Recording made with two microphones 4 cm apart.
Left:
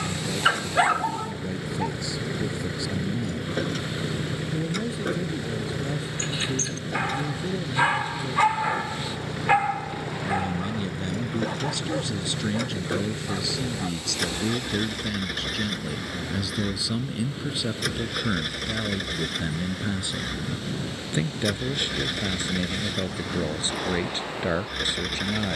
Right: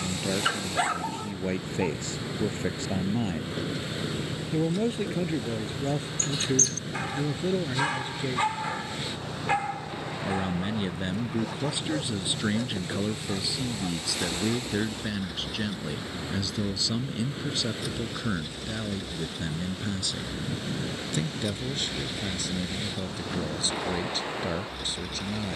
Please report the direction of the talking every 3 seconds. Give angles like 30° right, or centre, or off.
50° right, 50° right, 40° right, 20° right, 10° right, centre, 20° left, 30° left, 30° left.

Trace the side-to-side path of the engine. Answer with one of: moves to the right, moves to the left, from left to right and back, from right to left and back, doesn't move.
doesn't move.